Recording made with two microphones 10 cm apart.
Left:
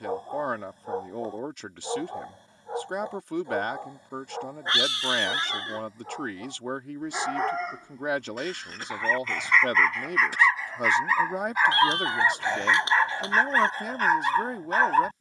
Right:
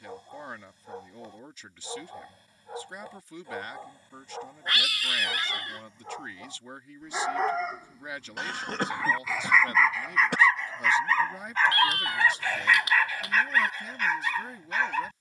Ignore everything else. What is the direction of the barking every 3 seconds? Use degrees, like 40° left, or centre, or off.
40° left, 20° left, centre, centre, 30° left.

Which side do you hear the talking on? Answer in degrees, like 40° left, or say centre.
70° left.